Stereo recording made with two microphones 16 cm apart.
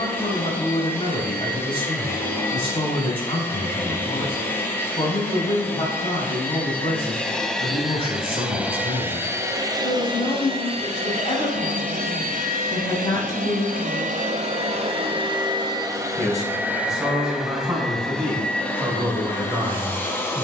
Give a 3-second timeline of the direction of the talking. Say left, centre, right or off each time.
left, left, left, left, left, centre, centre.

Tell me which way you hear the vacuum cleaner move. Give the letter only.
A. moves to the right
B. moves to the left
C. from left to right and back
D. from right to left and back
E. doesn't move
C.